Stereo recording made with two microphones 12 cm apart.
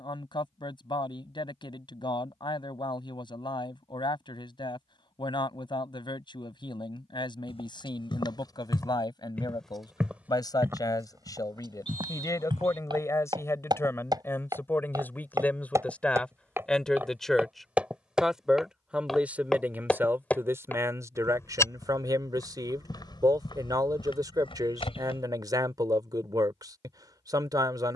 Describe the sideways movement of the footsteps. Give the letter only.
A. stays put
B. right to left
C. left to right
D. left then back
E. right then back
E.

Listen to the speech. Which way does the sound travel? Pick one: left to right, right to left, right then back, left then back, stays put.
left to right.